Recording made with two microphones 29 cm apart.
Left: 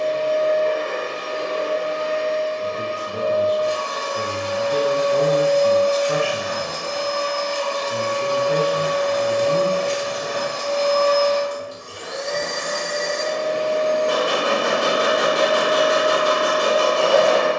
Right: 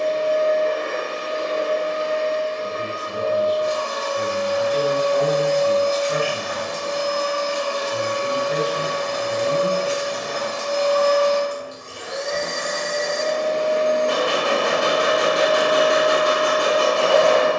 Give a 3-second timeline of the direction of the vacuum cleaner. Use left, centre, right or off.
left, left, centre, centre, left, left.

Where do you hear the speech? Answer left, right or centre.
left.